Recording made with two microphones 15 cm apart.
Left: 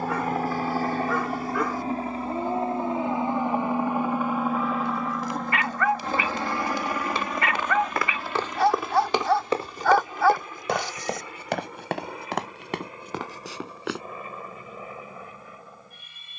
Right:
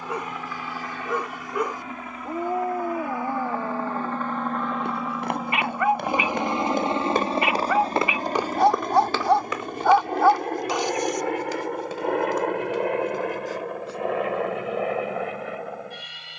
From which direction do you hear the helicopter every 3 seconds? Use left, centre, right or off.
left, centre, right, right, right, right.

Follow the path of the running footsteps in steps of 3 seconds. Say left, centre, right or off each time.
off, right, right, left, left, off.